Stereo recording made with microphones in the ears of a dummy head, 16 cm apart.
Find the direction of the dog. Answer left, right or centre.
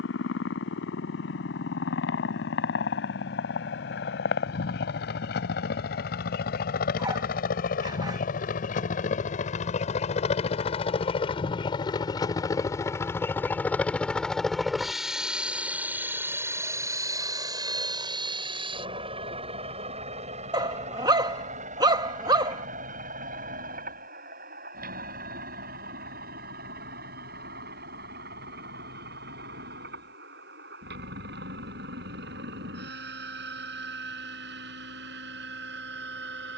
right.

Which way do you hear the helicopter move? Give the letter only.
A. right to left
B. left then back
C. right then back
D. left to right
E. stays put
D.